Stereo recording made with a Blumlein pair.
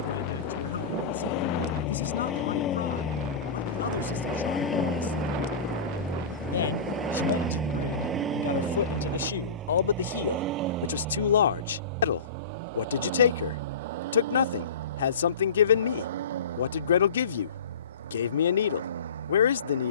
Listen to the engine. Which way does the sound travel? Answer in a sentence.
In this clip you hear the engine move to the right.